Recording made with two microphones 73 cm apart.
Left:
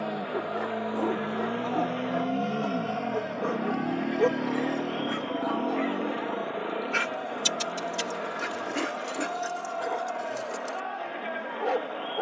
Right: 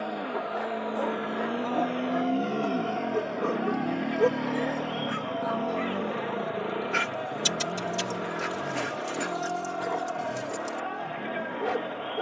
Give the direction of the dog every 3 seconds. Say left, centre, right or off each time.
centre, left, centre, right.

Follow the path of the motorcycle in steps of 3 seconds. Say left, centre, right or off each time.
left, centre, right, right.